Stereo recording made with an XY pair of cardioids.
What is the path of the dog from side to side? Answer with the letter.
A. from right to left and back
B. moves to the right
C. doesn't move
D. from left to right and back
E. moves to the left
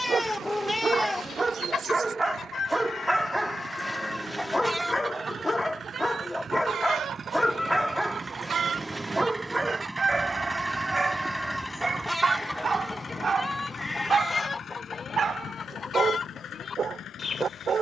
A.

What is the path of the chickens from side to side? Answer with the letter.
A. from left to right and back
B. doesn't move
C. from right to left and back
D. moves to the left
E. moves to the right
A.